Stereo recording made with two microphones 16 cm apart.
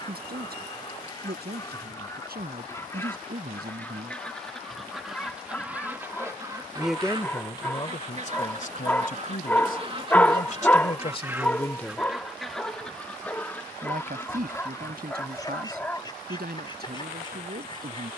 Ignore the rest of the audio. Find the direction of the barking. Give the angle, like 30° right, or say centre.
10° left.